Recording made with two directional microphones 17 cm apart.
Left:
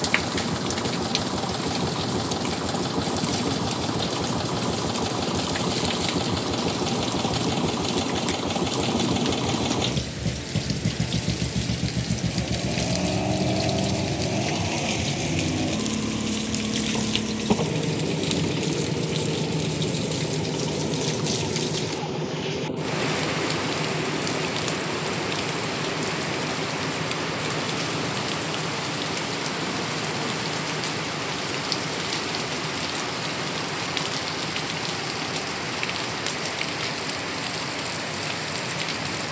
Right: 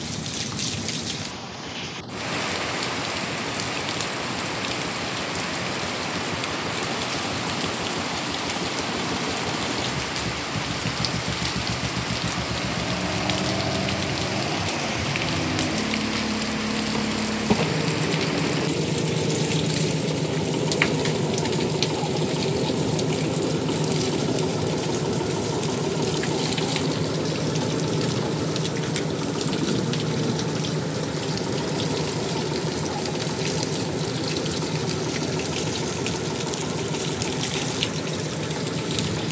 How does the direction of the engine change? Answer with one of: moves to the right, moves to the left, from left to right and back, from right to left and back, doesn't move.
moves to the right.